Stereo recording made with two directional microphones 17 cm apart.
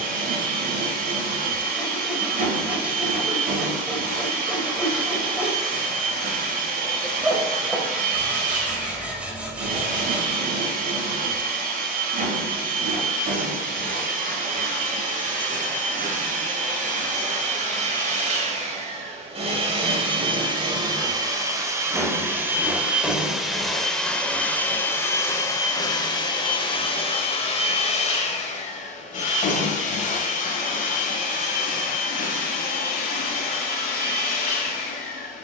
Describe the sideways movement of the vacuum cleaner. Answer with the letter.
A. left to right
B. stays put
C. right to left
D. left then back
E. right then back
C.